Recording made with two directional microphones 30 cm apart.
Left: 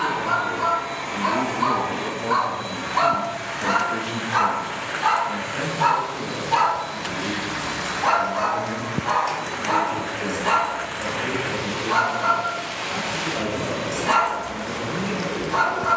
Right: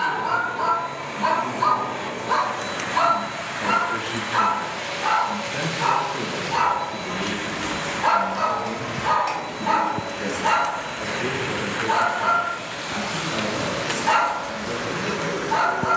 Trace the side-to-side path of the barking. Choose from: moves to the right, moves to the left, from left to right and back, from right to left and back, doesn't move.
from right to left and back.